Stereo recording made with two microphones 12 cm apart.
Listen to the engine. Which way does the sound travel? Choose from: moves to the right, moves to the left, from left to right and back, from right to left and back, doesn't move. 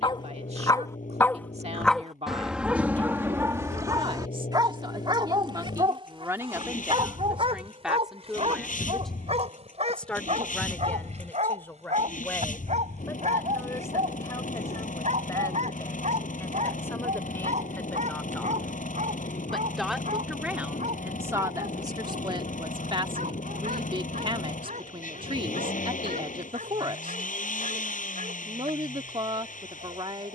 doesn't move.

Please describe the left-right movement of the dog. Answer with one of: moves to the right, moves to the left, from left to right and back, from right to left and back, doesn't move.
moves to the right.